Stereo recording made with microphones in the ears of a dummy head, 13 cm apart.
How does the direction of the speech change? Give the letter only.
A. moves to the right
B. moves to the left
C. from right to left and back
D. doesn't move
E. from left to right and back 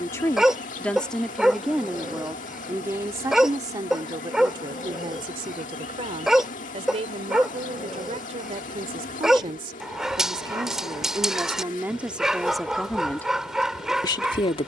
E.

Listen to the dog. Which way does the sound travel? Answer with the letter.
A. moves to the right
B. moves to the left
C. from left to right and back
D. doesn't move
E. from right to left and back
D.